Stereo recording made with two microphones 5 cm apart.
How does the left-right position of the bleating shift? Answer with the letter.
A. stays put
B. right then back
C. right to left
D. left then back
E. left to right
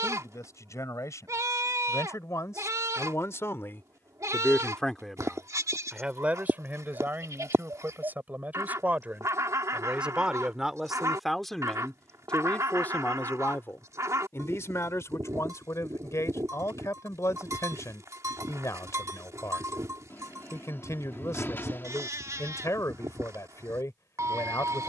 A.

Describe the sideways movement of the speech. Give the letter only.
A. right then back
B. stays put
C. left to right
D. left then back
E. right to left
A.